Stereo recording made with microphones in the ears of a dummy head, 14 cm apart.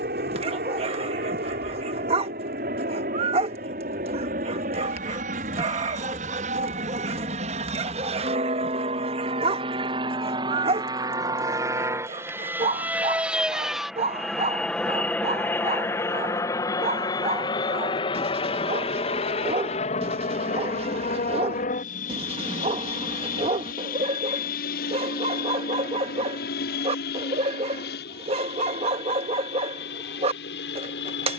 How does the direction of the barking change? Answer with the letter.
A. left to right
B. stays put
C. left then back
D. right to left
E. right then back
B.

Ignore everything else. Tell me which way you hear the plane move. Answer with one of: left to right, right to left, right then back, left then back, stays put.
right to left.